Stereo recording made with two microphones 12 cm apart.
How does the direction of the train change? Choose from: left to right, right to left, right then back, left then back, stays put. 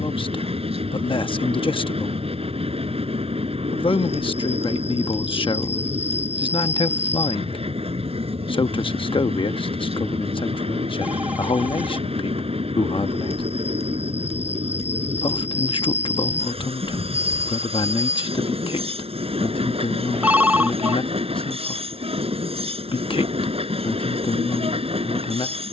stays put.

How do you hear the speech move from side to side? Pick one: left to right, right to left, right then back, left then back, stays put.
stays put.